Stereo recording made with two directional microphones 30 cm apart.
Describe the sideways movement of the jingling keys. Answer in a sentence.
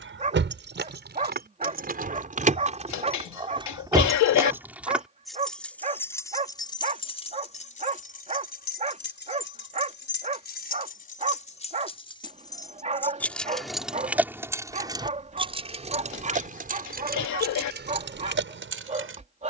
In this clip you hear the jingling keys move from right to left and back again.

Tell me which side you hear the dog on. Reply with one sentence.
You can hear the dog on the right.